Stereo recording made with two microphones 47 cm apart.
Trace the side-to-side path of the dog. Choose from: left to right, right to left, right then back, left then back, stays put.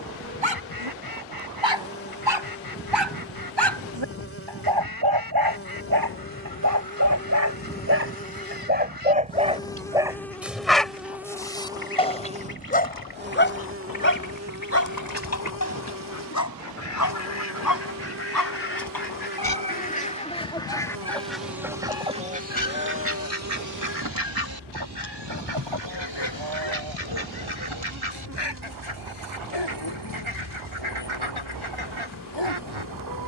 right to left.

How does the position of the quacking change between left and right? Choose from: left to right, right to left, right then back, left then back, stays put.
left to right.